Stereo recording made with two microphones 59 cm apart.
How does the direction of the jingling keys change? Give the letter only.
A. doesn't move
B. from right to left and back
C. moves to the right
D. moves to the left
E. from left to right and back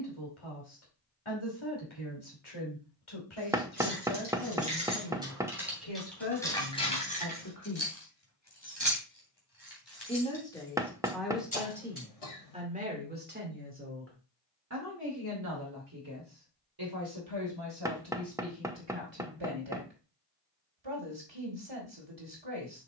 D.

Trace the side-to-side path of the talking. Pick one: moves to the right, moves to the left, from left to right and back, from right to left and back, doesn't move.
moves to the right.